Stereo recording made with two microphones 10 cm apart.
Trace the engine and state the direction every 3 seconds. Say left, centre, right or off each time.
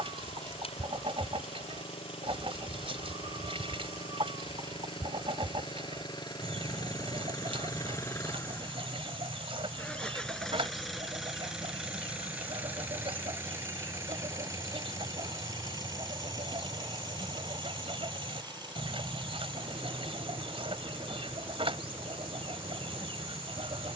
left, left, left, centre, right, right, right, right.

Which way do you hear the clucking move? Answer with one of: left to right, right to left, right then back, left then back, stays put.
stays put.